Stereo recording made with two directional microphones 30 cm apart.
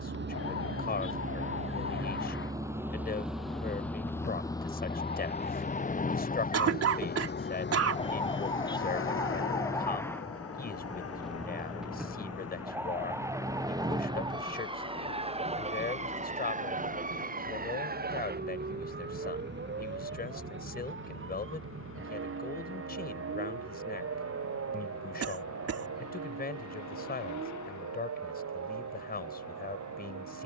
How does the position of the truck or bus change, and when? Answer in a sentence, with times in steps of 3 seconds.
In this clip you hear the truck or bus on the right from 0 s, in the centre from 3 s and on the left from 6 s.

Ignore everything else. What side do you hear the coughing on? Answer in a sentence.
In this clip you hear the coughing on the right.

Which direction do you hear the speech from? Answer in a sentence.
In this clip you hear the speech on the left.